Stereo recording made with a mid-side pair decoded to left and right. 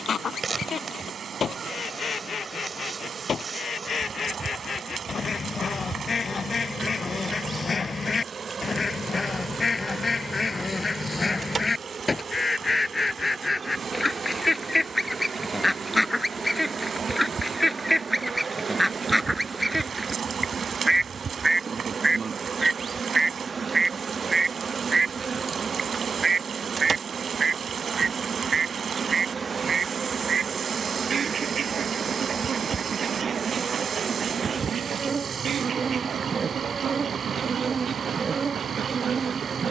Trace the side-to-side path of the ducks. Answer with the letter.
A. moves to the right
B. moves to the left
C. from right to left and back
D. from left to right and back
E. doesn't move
A.